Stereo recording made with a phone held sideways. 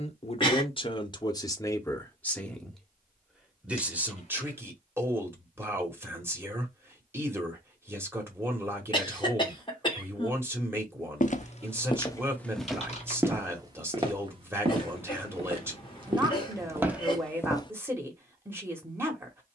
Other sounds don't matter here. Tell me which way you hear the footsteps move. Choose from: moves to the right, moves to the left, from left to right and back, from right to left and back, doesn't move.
from left to right and back.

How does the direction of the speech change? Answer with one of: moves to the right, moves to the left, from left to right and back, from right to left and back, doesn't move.
moves to the right.